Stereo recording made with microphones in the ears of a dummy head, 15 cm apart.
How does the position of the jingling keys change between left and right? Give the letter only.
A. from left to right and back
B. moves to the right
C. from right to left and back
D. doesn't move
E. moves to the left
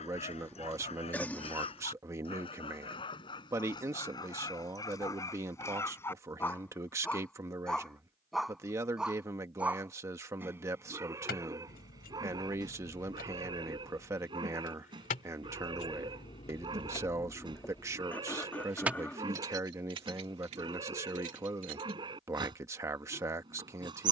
B.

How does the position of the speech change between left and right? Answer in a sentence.
In this clip you hear the speech stay put.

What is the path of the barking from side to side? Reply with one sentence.
You can hear the barking go from the left side to the right.